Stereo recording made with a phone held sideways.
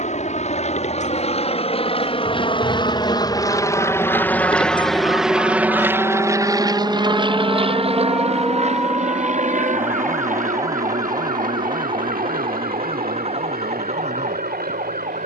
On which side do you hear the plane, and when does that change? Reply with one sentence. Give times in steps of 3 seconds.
In this clip you hear the plane on the left from 0 s, in the centre from 3 s and on the right from 6 s.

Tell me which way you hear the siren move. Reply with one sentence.
You can hear the siren travel towards the right.